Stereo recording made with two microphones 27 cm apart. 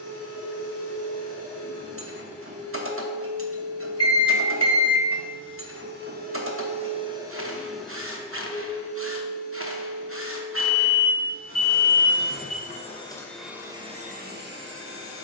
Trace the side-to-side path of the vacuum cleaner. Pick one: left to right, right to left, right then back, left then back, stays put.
left then back.